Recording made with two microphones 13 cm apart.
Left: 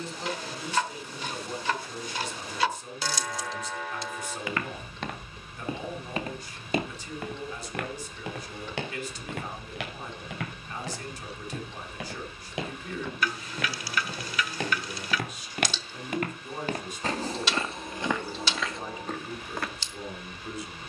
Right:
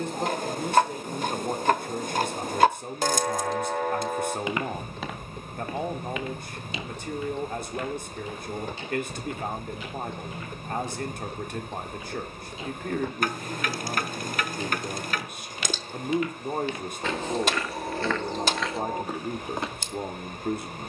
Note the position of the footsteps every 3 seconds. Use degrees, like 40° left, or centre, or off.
off, centre, 60° left, 80° left, 70° left, 50° left, centre.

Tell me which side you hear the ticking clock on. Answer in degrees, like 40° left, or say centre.
50° right.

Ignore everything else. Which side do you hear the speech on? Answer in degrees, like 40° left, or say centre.
50° right.